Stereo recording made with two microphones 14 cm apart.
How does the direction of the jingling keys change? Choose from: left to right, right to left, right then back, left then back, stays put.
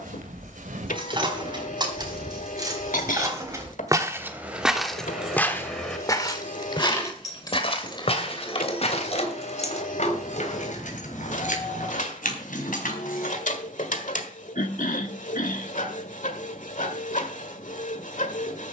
right to left.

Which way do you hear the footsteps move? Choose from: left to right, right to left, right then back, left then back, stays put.
right to left.